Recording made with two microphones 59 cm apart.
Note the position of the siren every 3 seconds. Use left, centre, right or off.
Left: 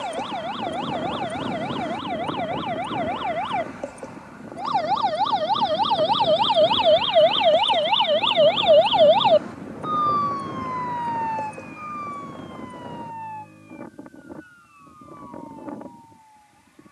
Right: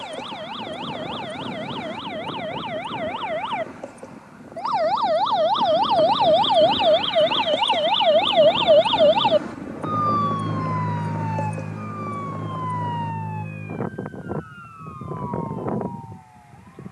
left, left, centre, right, right, right.